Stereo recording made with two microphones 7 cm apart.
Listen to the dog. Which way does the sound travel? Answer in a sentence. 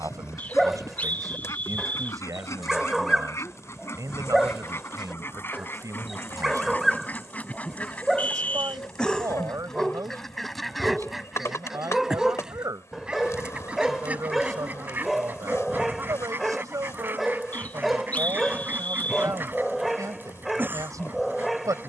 In this clip you hear the dog stay put.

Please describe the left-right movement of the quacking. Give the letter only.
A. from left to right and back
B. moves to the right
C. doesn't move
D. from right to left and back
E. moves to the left
B.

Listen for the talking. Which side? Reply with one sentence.
In this clip you hear the talking on the right.